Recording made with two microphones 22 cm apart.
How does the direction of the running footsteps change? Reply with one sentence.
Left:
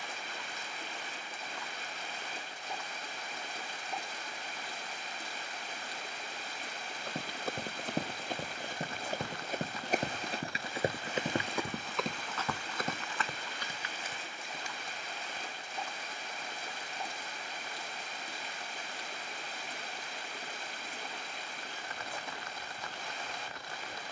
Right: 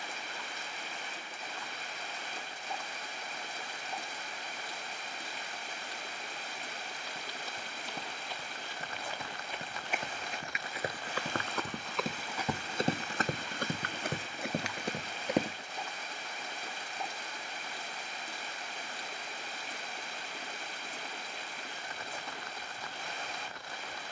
You can hear the running footsteps move to the right.